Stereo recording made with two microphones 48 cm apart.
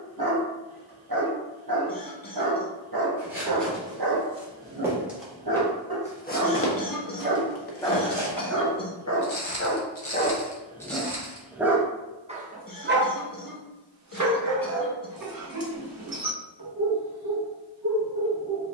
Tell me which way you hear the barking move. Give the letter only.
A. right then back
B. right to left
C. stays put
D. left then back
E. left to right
D.